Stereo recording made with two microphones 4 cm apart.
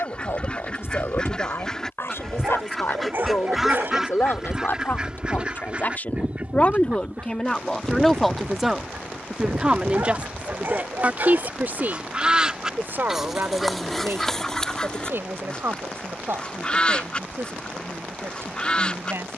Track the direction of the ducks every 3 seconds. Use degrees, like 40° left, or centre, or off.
20° left, 20° right, 40° right, 50° right, centre, 20° left, 20° left.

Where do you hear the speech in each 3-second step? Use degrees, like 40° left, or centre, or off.
70° left, 60° left, 10° left, 40° right, 60° right, 70° right, 70° right.